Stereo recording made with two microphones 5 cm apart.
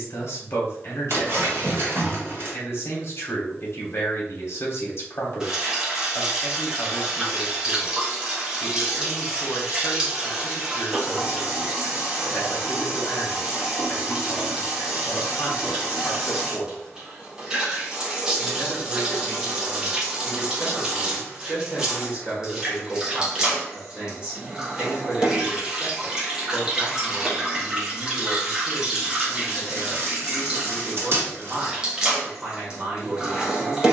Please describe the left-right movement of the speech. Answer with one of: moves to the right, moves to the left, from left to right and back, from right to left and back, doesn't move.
moves to the right.